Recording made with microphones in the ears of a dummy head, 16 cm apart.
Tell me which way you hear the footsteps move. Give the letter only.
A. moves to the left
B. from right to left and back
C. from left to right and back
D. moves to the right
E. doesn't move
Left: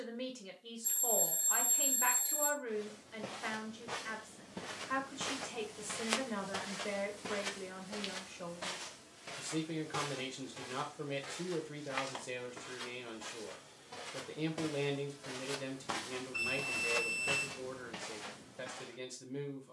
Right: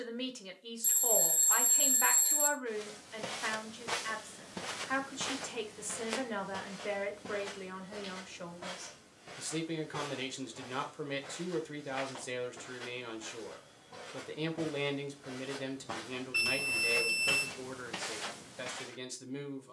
B.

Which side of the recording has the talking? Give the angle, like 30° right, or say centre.
30° right.